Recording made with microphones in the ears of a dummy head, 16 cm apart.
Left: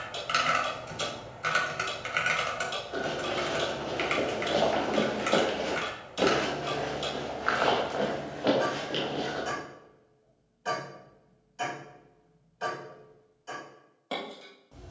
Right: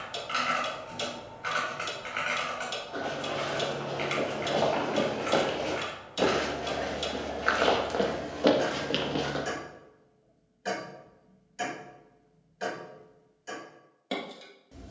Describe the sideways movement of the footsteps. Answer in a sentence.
You can hear the footsteps move to the right.